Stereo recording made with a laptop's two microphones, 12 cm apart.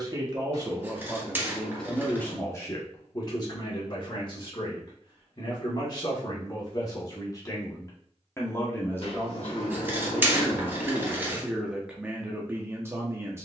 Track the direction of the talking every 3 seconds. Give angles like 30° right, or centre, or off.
centre, 40° left, 30° left, centre, 20° right.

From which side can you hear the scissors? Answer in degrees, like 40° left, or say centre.
20° right.